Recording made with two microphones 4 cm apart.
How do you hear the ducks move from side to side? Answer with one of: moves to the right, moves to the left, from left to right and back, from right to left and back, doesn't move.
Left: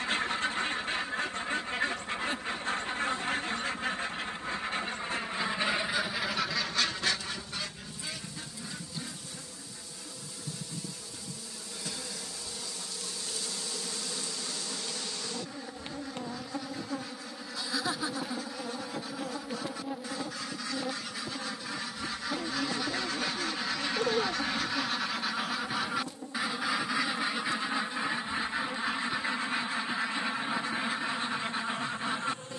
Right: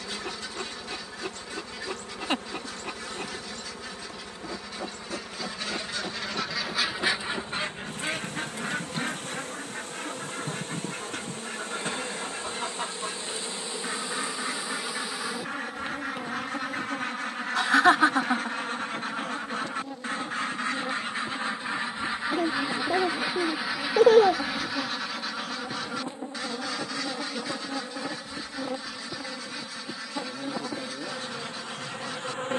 from left to right and back.